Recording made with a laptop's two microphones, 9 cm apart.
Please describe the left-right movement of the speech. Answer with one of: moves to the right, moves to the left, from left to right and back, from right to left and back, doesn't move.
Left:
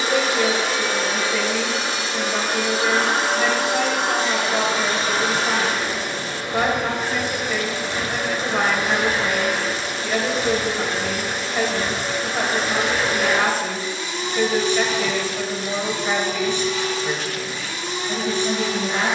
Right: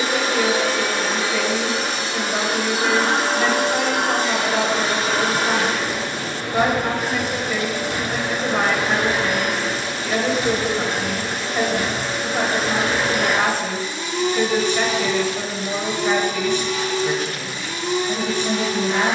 doesn't move.